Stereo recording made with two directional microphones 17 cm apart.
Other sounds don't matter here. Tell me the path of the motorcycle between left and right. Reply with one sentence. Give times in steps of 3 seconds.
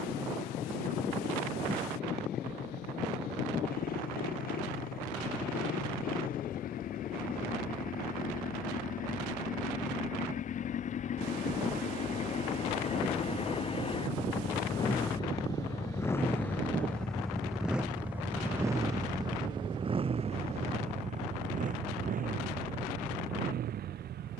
You can hear the motorcycle on the left from 0 s, in the centre from 15 s and on the right from 18 s.